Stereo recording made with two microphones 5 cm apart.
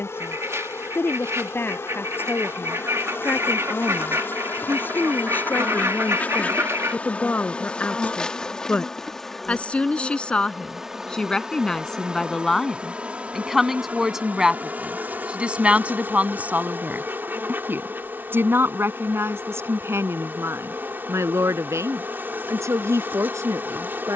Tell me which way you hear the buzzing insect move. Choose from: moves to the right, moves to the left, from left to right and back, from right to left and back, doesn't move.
moves to the right.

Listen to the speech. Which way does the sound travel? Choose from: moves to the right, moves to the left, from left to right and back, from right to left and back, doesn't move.
moves to the right.